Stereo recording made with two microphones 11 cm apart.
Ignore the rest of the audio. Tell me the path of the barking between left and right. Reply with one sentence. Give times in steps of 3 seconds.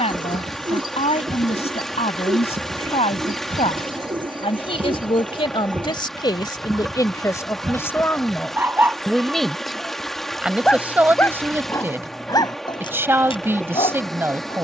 In this clip you hear the barking on the right from 0 s, in the centre from 9 s and on the left from 12 s.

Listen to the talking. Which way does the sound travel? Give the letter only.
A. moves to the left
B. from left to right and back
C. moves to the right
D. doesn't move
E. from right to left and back
C.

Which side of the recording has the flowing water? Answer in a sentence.
In this clip you hear the flowing water in the centre.